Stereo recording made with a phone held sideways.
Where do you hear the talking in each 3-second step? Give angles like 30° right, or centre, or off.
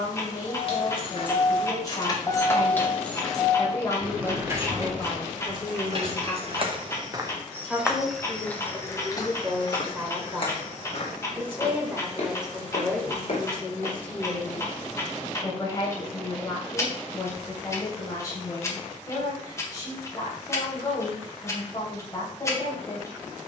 30° left, 20° left, 10° left, 10° right, centre, 20° left, 30° left, 30° left.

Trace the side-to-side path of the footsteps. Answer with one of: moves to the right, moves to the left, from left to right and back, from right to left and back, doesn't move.
moves to the left.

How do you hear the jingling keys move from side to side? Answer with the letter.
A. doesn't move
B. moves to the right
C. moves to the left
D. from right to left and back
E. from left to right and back
B.